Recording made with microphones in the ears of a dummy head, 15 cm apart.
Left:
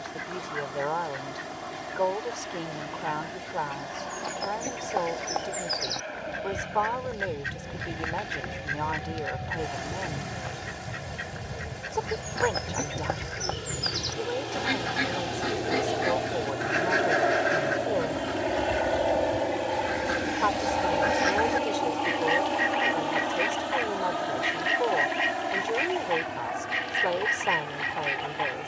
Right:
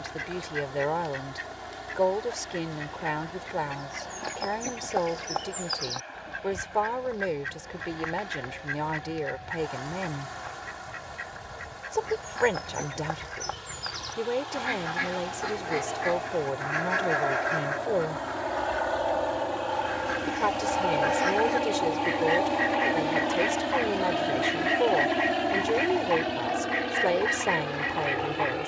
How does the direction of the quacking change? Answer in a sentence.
You can hear the quacking travel towards the left.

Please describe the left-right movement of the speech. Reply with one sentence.
In this clip you hear the speech stay put.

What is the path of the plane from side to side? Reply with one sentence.
In this clip you hear the plane move to the right.